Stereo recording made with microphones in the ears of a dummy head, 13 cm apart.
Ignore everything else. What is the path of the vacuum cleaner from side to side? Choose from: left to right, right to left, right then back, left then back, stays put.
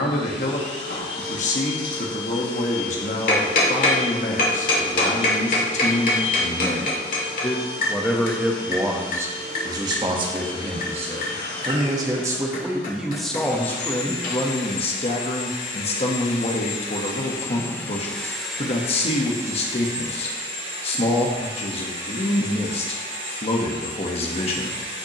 left to right.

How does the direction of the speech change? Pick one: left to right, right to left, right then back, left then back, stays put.
right then back.